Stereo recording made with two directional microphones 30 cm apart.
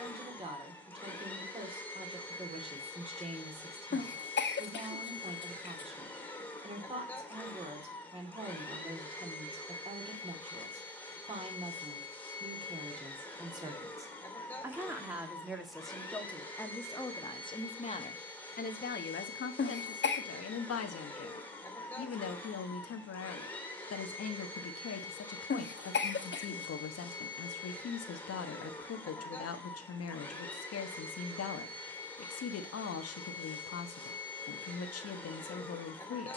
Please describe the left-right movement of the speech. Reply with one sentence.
In this clip you hear the speech go from the right side to the left.